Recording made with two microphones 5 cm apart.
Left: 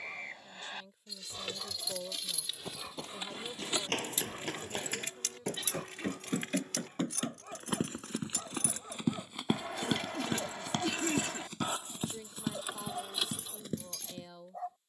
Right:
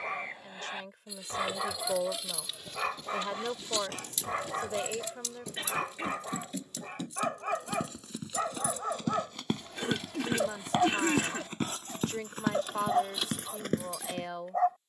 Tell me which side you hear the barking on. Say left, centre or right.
right.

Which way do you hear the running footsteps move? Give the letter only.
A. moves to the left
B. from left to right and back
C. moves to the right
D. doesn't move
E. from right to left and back
C.